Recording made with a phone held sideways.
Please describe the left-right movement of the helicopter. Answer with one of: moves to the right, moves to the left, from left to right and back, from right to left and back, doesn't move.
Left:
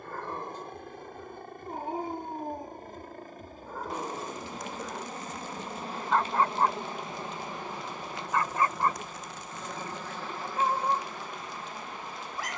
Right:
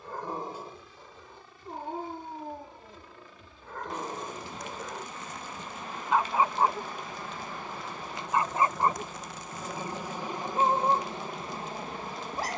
moves to the right.